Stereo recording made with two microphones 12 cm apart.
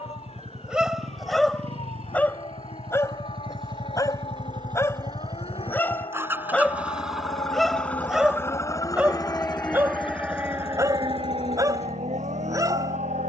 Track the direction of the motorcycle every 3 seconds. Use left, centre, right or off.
right, right, centre, left, left.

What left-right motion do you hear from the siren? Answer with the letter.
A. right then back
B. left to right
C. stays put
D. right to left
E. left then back
B.